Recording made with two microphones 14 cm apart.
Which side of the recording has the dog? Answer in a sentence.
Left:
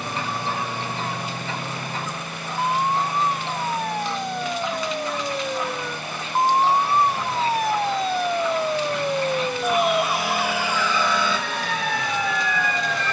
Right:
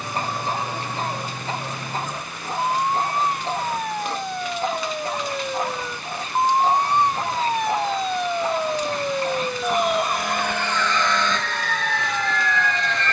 In this clip you hear the dog on the right.